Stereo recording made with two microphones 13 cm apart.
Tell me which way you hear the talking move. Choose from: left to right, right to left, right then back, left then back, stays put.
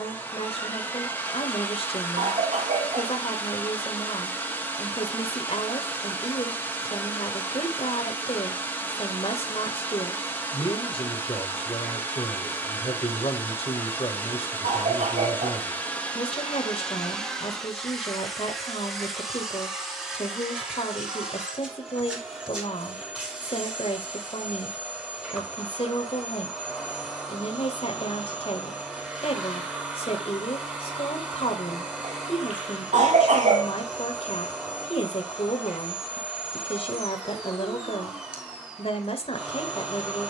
stays put.